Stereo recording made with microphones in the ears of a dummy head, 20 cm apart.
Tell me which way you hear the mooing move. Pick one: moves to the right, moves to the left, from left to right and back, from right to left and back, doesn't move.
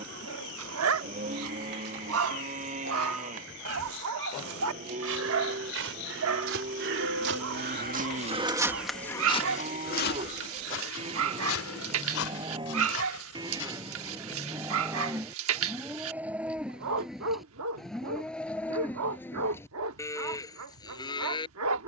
moves to the left.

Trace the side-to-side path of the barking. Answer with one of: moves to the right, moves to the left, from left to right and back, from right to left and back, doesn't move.
doesn't move.